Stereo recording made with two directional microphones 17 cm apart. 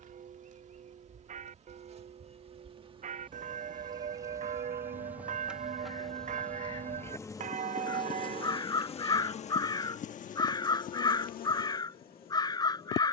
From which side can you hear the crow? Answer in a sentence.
In this clip you hear the crow on the left.